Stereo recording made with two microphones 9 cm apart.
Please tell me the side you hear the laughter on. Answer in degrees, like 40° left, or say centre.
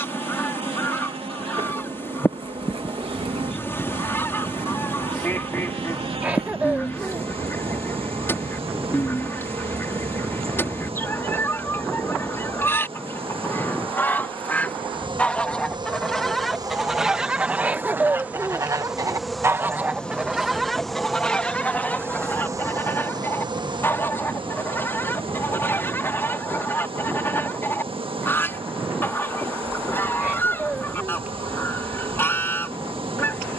10° right.